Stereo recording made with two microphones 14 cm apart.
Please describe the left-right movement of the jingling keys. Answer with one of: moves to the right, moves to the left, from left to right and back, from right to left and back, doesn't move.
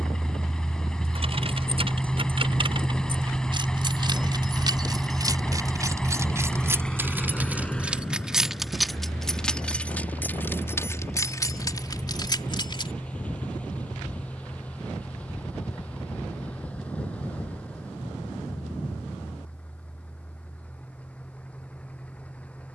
moves to the left.